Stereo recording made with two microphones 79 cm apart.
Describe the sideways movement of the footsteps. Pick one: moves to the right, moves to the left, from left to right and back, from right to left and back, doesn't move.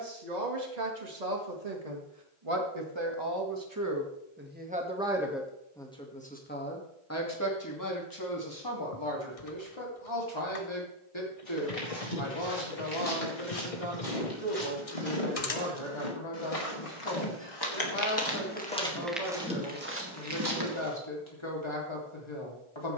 moves to the right.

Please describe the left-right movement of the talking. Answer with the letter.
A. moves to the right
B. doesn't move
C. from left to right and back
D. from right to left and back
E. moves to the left
E.